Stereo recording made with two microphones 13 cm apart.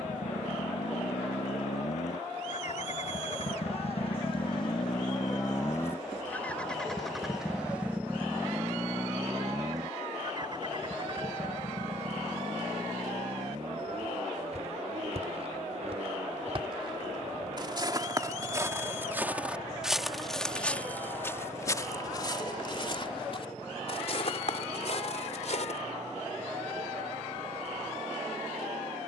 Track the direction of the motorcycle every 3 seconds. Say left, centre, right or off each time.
left, left, centre, right, right, right, right, right, right, right.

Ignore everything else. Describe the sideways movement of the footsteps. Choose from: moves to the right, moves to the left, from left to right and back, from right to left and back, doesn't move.
moves to the left.